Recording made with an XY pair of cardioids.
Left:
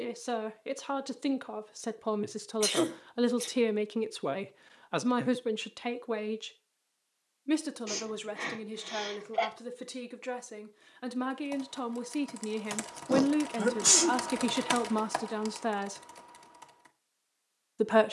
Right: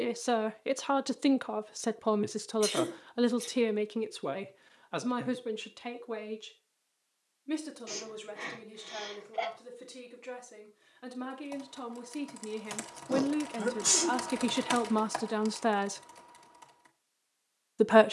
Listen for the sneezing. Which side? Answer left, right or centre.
left.